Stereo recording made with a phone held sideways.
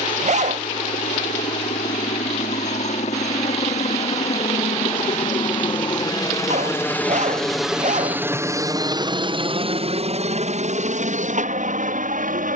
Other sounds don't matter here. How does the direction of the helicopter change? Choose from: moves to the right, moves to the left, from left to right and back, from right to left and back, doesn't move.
moves to the right.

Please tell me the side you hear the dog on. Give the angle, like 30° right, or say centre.
60° right.